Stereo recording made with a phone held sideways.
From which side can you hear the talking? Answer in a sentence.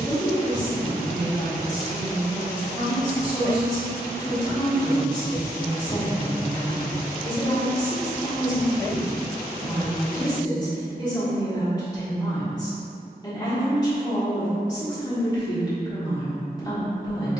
In this clip you hear the talking on the left.